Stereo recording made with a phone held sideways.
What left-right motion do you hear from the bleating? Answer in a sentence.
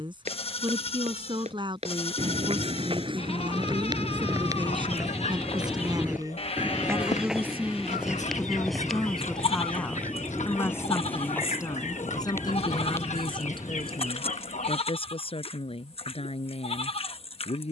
You can hear the bleating stay in one place.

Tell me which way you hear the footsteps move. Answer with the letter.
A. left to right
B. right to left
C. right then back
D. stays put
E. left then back
B.